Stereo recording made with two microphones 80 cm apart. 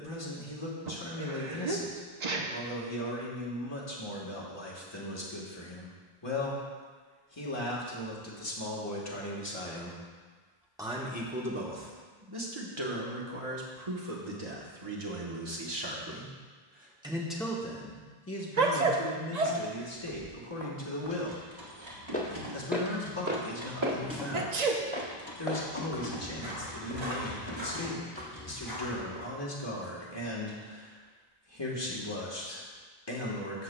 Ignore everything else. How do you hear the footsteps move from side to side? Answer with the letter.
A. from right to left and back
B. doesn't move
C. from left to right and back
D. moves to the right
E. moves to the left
C.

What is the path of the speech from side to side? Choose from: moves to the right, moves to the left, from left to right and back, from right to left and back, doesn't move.
from left to right and back.